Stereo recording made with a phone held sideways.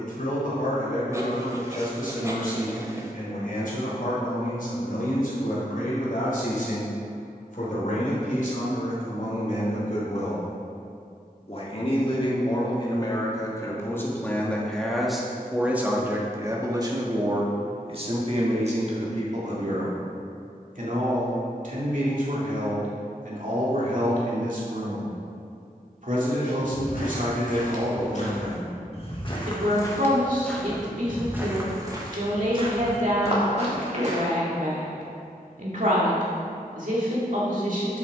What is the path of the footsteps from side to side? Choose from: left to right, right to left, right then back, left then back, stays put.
left to right.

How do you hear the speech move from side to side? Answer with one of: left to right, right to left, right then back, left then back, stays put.
left to right.